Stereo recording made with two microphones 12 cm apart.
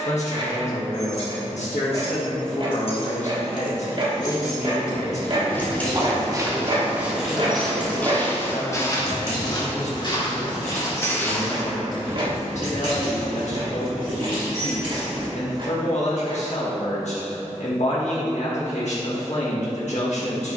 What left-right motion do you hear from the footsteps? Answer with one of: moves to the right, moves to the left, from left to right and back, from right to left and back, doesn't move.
from right to left and back.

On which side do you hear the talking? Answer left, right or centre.
left.